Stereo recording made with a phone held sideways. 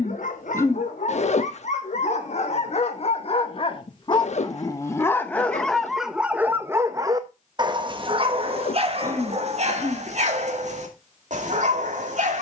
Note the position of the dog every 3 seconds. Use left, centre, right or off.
left, left, right, right.